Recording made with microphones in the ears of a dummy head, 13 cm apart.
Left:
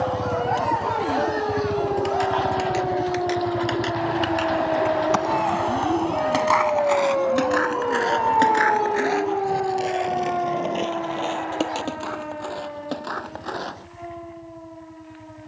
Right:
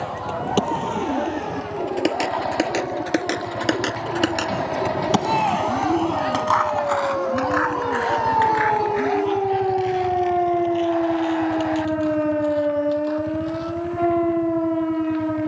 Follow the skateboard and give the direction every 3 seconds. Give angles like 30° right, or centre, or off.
80° right, 50° right, 30° left, 60° left, 70° left.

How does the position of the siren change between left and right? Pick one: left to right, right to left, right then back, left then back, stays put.
left to right.